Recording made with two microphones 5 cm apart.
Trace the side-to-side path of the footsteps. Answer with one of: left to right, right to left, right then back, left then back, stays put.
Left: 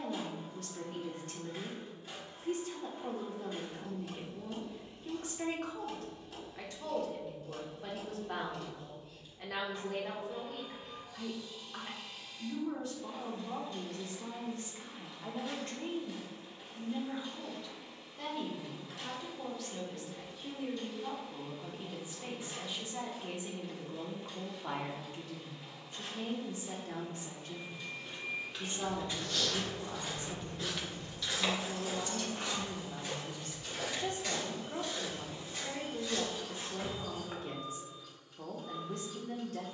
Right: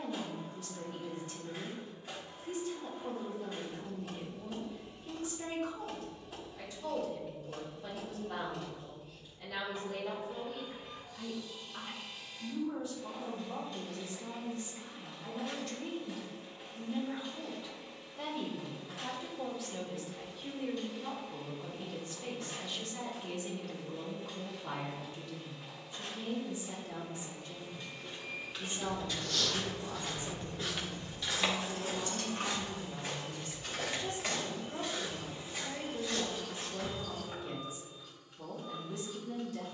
right then back.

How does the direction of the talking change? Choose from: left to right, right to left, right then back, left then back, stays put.
right then back.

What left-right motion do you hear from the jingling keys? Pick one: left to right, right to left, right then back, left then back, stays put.
left to right.